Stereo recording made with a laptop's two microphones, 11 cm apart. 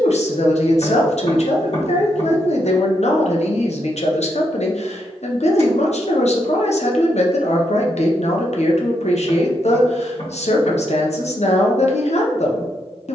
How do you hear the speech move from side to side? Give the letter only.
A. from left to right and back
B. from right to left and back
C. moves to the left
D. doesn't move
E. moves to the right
D.